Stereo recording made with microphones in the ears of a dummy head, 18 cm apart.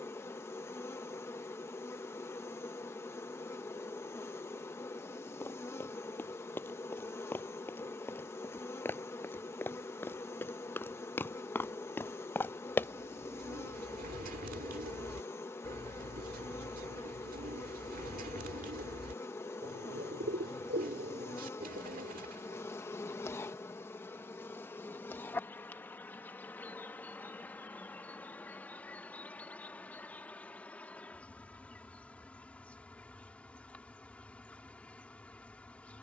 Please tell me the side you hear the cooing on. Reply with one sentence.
You can hear the cooing on the right.